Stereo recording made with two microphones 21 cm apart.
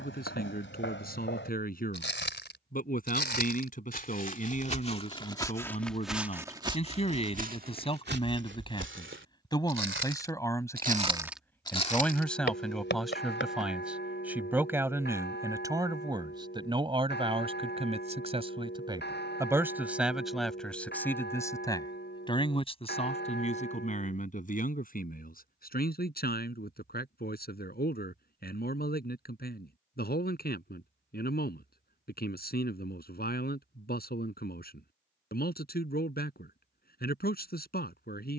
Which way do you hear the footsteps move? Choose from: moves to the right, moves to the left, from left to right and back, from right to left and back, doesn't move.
from left to right and back.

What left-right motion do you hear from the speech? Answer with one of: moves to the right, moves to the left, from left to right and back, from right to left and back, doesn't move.
from left to right and back.